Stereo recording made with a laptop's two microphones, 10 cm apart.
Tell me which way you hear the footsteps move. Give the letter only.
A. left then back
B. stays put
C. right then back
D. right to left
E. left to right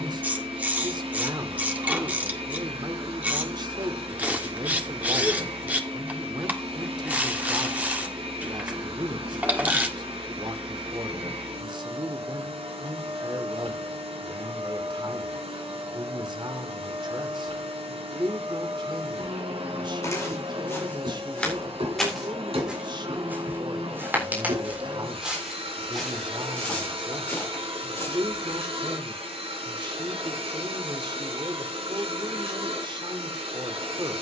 C.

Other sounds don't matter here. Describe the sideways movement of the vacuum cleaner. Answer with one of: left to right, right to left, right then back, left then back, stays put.
stays put.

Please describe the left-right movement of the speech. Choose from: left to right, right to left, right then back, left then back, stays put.
stays put.